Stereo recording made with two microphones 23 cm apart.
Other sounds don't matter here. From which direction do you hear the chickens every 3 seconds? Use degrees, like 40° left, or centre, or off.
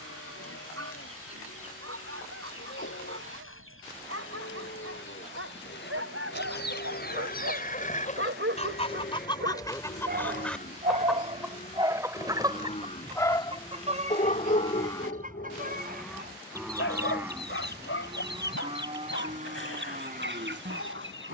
70° left, 60° left, 40° left, 10° left, 20° right, 40° right, 50° right.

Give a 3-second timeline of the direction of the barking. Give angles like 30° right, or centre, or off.
80° right, 80° right, 70° right, 40° right, 20° left, 60° left, 70° left.